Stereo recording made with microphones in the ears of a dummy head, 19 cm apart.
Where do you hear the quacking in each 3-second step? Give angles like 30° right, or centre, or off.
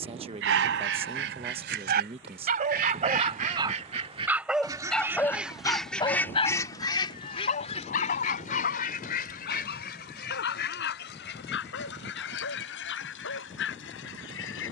60° right, 20° right, 30° left, 50° left, 60° left.